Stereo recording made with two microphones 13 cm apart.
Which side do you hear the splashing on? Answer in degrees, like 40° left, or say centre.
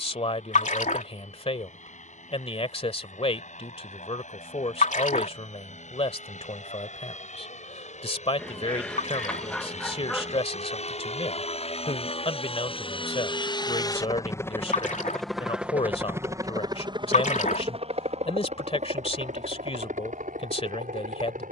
70° left.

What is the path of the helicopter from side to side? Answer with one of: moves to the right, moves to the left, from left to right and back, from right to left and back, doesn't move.
moves to the right.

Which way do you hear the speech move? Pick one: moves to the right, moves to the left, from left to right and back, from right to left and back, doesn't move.
doesn't move.